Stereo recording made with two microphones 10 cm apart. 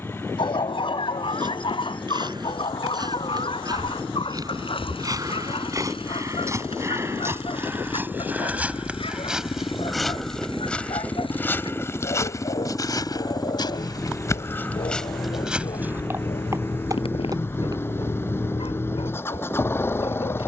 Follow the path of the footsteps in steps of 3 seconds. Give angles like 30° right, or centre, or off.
50° right, 40° right, 20° right, 10° left, 30° left, 20° right, off.